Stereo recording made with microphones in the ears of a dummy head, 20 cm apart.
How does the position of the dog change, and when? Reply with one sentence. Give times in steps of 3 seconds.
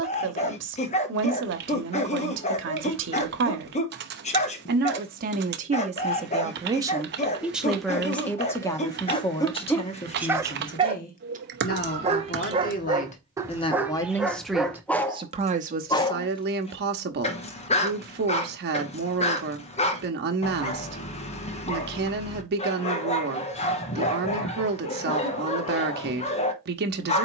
In this clip you hear the dog on the left from 0 s, in the centre from 9 s and on the left from 15 s.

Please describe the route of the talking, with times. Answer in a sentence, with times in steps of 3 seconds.
You can hear the talking on the right from 0 s, in the centre from 6 s, on the left from 9 s and on the right from 15 s.